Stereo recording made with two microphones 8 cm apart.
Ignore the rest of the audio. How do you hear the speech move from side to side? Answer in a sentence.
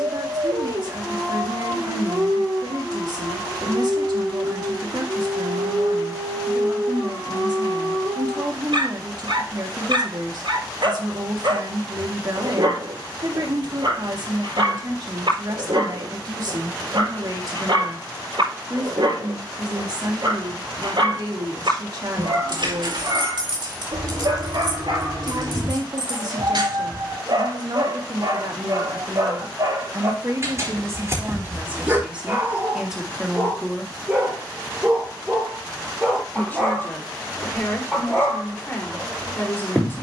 In this clip you hear the speech go from the right side to the left.